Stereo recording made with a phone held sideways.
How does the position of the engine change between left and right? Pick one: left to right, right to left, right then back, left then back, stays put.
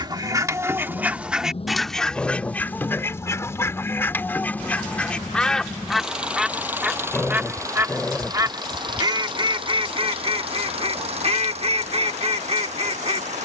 left to right.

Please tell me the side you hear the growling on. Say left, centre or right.
centre.